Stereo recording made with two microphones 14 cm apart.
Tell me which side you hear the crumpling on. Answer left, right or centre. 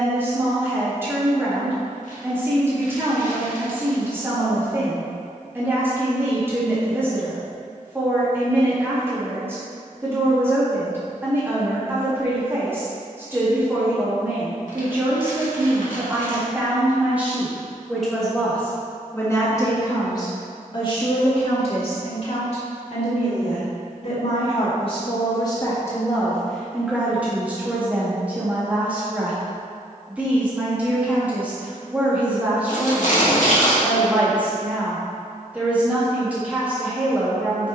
left.